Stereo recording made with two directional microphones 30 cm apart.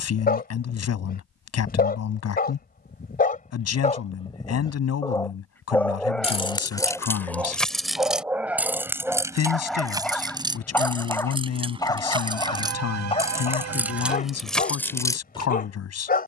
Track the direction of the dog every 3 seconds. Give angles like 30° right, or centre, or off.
30° left, 20° left, centre, centre, 20° left, 30° left.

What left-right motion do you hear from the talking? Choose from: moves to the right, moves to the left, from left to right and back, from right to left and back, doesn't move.
doesn't move.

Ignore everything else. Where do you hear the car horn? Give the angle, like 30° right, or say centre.
60° right.